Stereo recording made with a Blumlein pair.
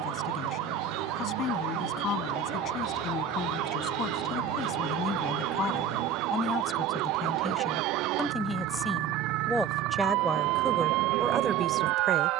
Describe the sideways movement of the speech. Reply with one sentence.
In this clip you hear the speech move from left to right.